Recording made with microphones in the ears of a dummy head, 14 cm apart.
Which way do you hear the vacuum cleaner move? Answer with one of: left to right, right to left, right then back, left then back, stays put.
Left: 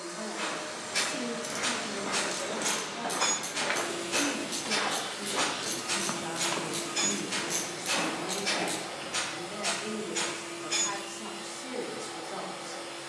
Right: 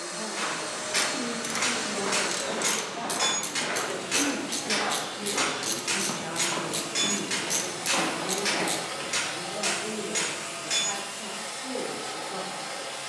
left then back.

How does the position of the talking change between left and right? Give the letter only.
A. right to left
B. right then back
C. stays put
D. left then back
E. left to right
B.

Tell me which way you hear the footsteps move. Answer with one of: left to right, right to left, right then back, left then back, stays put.
left then back.